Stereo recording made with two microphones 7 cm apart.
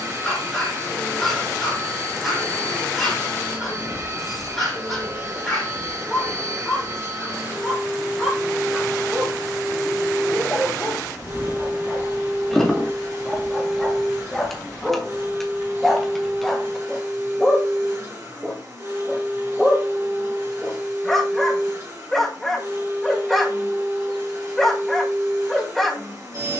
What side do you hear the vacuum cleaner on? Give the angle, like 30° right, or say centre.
40° right.